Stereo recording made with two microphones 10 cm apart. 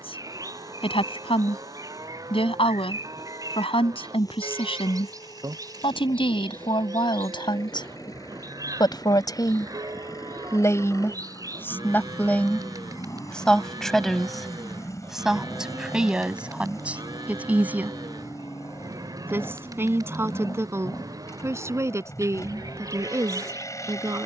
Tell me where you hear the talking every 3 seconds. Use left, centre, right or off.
left, left, left, left, centre, centre, right, right.